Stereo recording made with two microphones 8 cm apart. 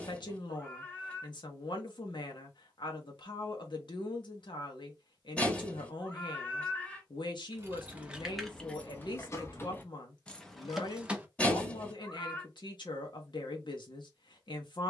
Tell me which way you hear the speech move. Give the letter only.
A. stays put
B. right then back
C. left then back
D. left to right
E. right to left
A.